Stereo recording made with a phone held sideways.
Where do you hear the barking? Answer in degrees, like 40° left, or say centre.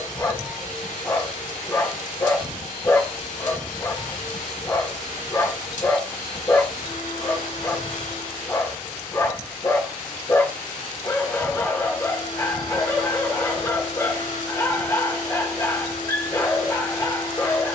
20° left.